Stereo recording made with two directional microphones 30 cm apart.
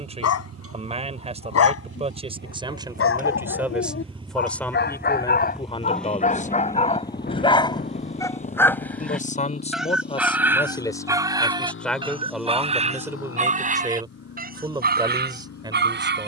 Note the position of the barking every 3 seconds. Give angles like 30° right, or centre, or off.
50° left, 40° left, 20° left, 10° right, 20° right, 30° right.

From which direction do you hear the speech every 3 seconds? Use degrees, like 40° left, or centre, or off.
20° right, centre, 20° left, 10° left, 10° right, 10° right.